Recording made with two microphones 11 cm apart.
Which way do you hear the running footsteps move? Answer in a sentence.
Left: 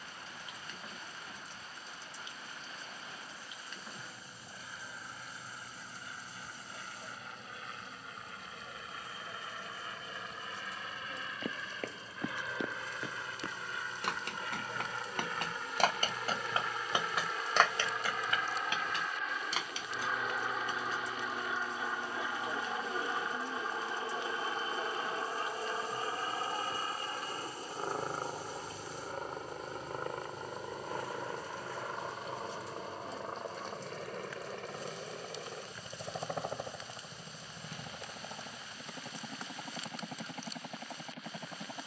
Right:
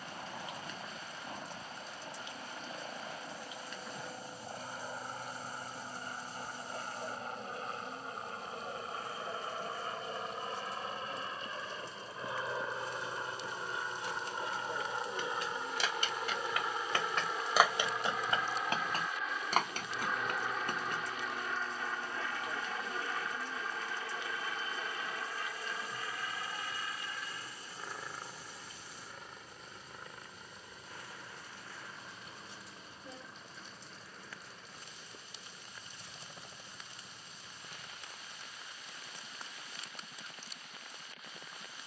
You can hear the running footsteps move to the right.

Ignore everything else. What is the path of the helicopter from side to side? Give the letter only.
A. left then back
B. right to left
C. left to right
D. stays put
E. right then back
B.